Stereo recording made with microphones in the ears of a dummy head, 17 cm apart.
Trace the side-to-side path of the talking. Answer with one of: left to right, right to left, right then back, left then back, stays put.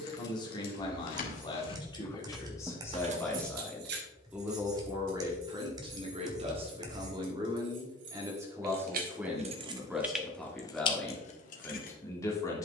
right then back.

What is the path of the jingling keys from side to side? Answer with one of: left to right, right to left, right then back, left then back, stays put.
right then back.